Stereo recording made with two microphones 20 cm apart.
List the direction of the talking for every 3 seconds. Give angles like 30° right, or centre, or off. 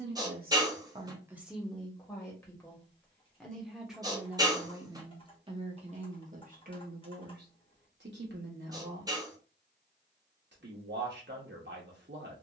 10° right, 10° right, 50° right, 60° right.